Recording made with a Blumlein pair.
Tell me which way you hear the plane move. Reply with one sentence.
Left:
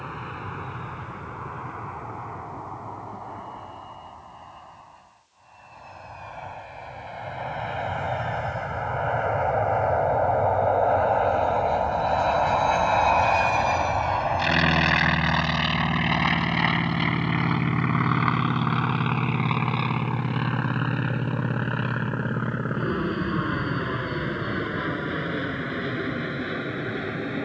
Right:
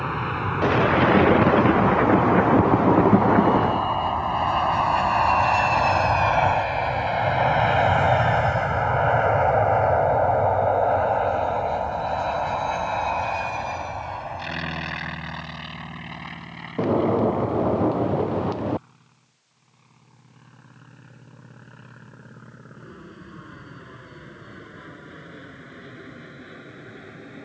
In this clip you hear the plane move from right to left.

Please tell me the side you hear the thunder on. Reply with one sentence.
In this clip you hear the thunder on the right.